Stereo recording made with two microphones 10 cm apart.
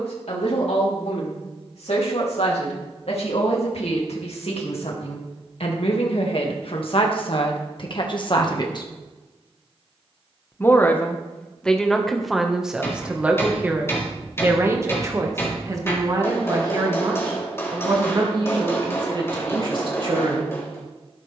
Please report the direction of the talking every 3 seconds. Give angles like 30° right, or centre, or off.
80° left, 70° left, 50° left, 10° left, 10° right, 40° right, 50° right.